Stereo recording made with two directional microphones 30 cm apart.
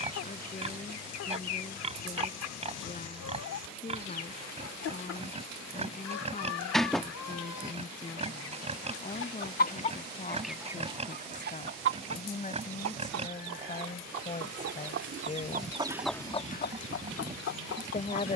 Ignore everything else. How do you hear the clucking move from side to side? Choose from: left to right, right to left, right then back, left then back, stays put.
right then back.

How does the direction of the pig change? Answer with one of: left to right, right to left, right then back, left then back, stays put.
stays put.